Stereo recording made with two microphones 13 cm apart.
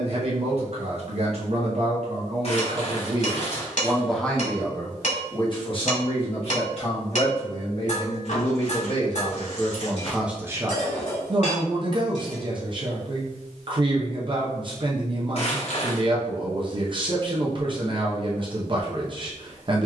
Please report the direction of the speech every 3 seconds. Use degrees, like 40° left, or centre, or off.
50° right, 10° left, 50° left, 10° right, 40° right, 40° right, 40° right.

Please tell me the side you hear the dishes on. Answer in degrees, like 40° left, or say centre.
60° left.